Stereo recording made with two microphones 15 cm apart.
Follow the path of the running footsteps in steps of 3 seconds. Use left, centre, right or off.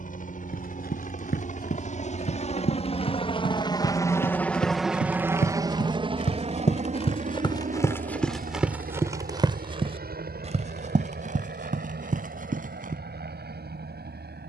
left, left, left, right, right.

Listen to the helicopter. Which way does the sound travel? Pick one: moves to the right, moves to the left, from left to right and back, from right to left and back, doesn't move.
moves to the right.